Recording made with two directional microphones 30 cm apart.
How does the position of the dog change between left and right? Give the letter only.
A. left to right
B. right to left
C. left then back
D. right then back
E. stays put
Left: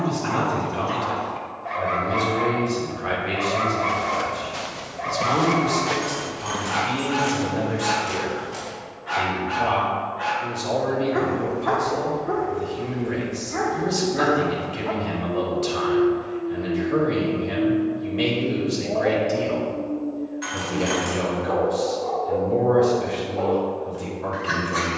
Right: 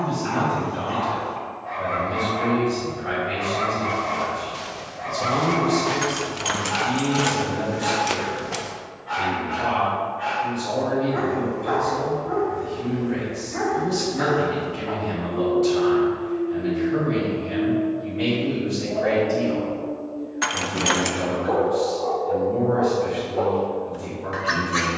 A.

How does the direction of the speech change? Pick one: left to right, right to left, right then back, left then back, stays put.
stays put.